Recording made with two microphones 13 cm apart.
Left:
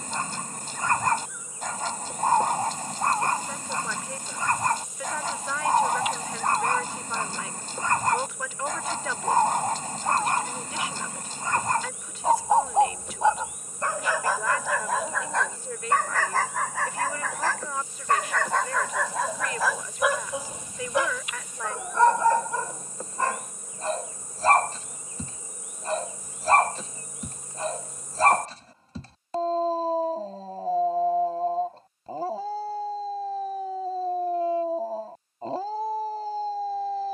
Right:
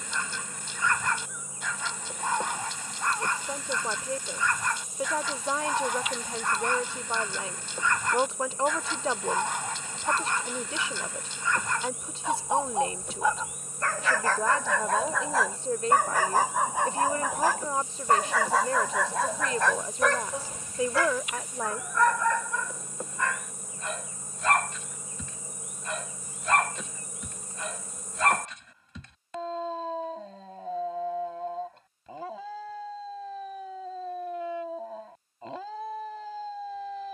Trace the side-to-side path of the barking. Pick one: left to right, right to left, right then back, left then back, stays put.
right then back.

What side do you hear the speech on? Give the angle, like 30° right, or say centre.
30° right.